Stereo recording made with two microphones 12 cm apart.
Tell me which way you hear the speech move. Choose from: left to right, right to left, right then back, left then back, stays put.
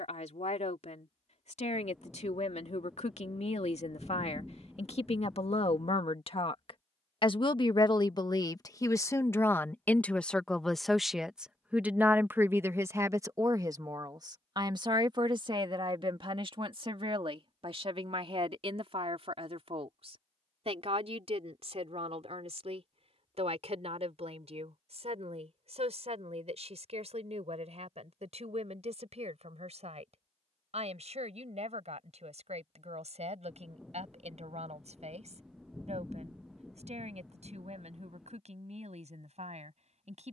left to right.